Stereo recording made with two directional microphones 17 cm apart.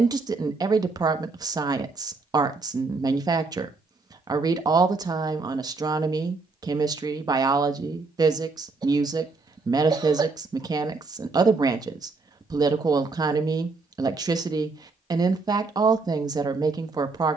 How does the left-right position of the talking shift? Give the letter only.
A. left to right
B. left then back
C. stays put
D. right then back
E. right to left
C.